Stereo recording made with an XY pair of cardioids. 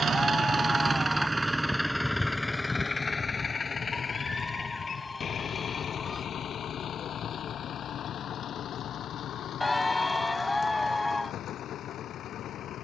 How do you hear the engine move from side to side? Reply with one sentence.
In this clip you hear the engine move to the left.